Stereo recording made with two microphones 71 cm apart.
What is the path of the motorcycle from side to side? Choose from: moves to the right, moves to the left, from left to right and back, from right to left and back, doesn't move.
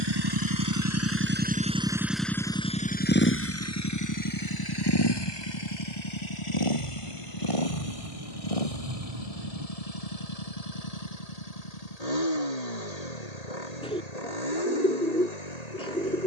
moves to the left.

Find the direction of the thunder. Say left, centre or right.
right.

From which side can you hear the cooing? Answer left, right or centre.
centre.